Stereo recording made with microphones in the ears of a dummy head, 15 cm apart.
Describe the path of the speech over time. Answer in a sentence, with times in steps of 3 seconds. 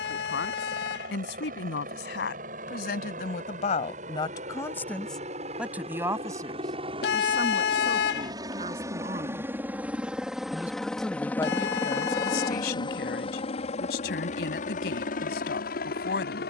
You can hear the speech on the left from 0 s, on the right from 6 s, in the centre from 9 s and on the left from 12 s.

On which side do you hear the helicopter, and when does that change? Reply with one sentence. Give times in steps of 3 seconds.
In this clip you hear the helicopter on the right from 0 s, in the centre from 9 s and on the left from 12 s.